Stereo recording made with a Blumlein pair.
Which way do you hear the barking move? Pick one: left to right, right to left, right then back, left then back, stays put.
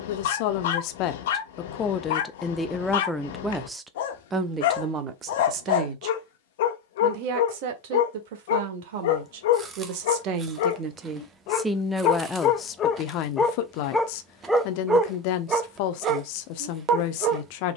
left to right.